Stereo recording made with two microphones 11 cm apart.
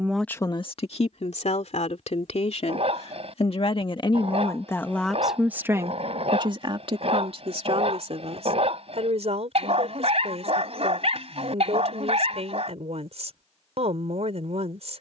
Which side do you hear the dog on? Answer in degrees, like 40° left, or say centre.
60° right.